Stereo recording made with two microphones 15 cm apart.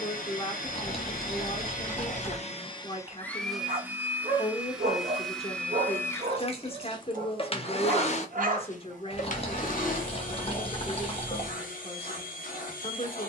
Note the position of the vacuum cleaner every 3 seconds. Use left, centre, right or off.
left, centre, left, left, left.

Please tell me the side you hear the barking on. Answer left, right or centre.
right.